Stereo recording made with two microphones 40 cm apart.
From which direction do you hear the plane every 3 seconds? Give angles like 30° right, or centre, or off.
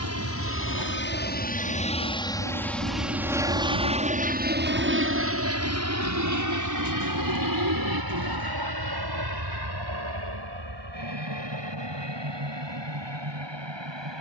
20° left, 20° right, 50° right, 60° right, 70° right.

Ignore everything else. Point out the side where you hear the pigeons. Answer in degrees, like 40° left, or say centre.
60° right.